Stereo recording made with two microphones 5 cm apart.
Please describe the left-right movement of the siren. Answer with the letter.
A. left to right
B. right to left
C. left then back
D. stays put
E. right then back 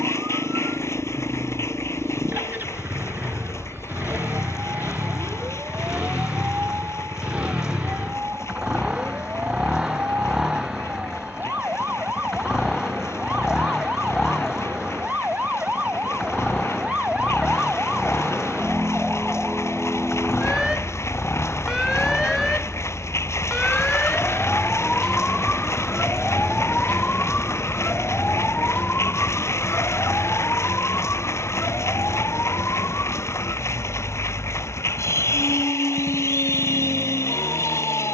B.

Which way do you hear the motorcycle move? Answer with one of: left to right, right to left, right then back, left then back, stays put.
right to left.